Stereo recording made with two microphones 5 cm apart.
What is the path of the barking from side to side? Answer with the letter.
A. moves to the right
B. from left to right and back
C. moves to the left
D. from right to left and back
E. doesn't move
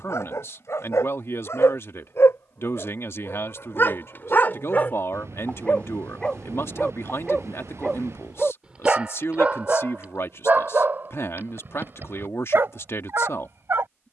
A.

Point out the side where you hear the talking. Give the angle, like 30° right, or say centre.
60° left.